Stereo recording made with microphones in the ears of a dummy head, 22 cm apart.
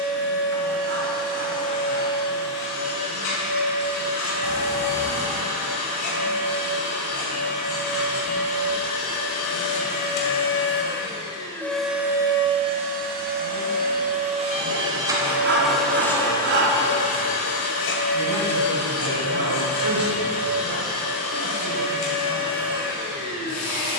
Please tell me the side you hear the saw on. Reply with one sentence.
In this clip you hear the saw on the right.